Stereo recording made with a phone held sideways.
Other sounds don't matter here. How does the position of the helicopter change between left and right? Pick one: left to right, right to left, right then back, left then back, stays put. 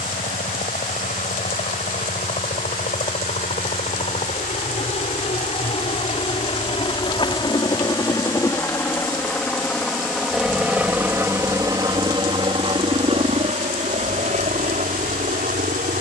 left to right.